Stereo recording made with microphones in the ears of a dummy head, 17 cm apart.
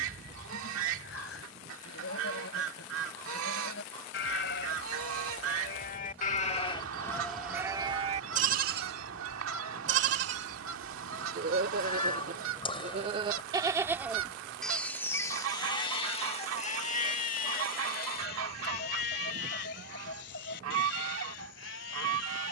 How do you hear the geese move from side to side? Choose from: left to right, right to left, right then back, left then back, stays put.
stays put.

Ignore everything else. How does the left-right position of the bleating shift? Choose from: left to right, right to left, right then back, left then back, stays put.
right then back.